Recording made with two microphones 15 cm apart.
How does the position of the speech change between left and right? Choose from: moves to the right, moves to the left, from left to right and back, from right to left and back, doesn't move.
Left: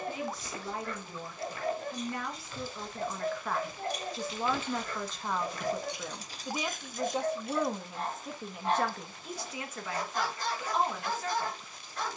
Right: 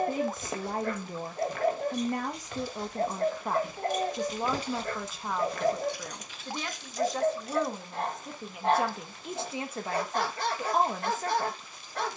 from right to left and back.